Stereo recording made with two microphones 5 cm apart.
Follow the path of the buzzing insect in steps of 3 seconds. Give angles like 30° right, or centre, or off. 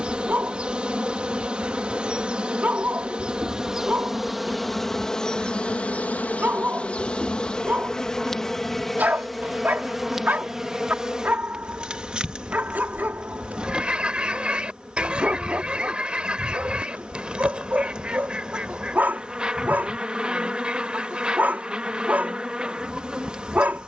20° right, centre, 10° left, 10° right, 20° right, 20° right, 20° right, 20° right.